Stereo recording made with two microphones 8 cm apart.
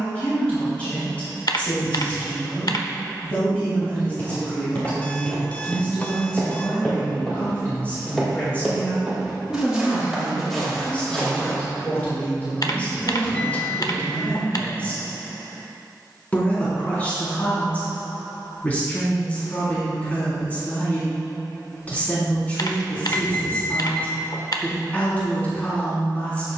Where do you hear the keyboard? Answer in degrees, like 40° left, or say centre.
60° left.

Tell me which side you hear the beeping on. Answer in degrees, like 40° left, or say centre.
20° left.